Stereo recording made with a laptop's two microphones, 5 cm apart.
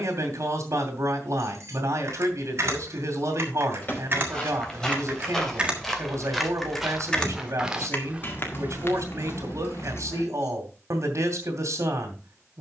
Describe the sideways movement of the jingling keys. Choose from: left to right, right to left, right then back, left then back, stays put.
right to left.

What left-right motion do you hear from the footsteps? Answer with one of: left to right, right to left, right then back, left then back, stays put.
left to right.